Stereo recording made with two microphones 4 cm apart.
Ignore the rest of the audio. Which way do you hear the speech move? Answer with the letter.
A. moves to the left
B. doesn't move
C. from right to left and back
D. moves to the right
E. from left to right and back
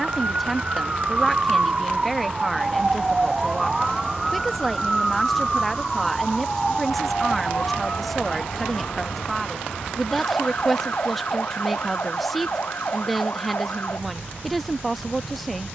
B.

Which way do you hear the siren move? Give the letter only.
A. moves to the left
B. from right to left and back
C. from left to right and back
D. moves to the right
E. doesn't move
A.